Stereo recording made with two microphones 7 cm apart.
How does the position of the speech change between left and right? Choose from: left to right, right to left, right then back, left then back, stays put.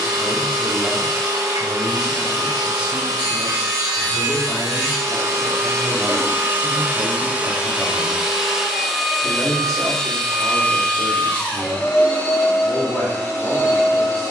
right to left.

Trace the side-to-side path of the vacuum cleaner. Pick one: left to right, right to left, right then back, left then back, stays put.
right to left.